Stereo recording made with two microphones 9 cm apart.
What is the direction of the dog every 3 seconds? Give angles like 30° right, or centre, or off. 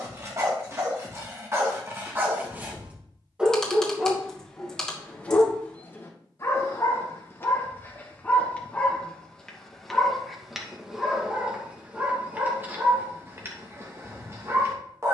30° right, 10° left, 20° left, centre, 30° right.